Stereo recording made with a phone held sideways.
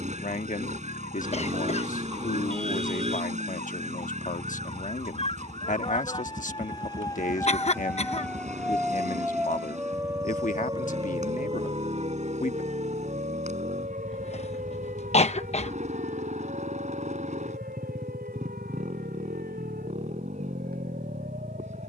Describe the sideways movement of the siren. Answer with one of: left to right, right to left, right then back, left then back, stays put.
left to right.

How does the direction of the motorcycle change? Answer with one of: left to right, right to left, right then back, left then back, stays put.
stays put.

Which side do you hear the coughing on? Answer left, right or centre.
left.